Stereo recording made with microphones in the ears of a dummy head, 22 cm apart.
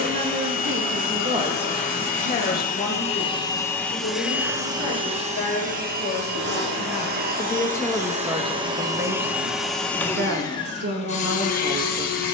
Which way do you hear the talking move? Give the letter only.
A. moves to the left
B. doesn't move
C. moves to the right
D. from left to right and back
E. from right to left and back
E.